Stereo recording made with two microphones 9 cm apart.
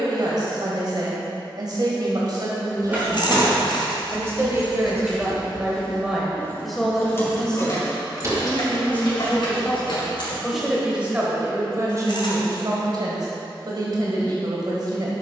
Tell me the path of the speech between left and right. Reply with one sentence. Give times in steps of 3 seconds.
You can hear the speech on the right from 0 s, in the centre from 6 s and on the right from 12 s.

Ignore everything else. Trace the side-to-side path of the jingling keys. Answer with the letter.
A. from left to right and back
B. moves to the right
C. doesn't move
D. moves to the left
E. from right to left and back
D.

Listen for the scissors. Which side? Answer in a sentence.
In this clip you hear the scissors on the left.